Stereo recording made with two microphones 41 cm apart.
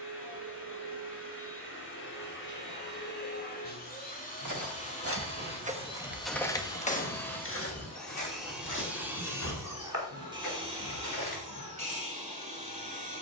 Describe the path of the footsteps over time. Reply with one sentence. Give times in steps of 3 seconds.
In this clip you hear the footsteps not at all from 0 s, on the right from 3 s, on the left from 6 s and not at all from 12 s.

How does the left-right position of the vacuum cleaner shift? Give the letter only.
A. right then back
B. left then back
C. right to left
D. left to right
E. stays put
D.